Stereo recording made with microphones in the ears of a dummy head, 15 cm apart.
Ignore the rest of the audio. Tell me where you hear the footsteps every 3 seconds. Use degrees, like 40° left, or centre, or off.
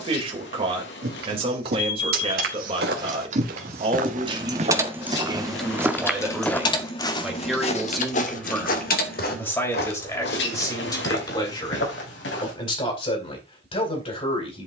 60° right, 40° right, 30° left, 60° left, 70° left.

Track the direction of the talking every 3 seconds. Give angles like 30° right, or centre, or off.
30° right, 30° right, centre, 20° left, 30° left.